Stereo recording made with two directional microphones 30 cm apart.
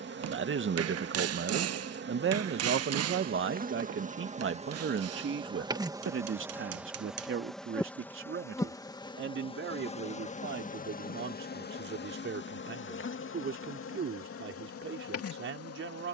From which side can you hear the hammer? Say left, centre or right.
right.